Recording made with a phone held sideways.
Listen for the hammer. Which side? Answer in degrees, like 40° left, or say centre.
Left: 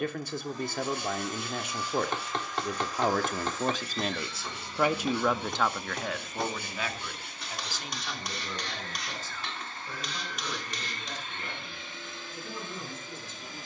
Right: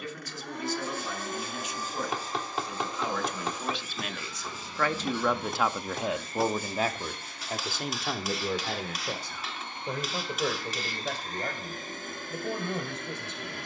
centre.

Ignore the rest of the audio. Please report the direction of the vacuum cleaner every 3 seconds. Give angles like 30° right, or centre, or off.
50° right, centre, centre, 30° right, 60° right.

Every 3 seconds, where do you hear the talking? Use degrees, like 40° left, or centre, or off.
60° left, 20° left, 50° right, 70° right, 70° right.